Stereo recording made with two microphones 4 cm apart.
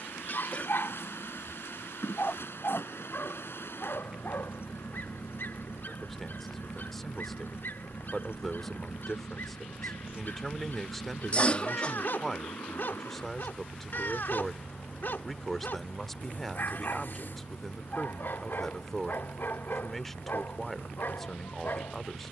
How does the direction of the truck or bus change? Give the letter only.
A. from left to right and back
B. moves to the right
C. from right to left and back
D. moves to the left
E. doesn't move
E.